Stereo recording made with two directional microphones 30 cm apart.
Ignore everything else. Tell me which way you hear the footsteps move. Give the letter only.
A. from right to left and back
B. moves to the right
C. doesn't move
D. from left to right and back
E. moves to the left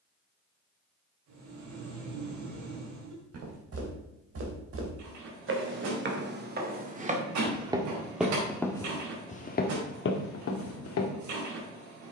E.